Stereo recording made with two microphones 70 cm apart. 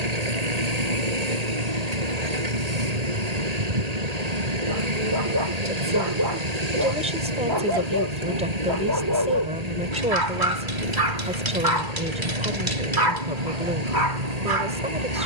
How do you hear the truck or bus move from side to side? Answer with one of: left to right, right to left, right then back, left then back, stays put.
stays put.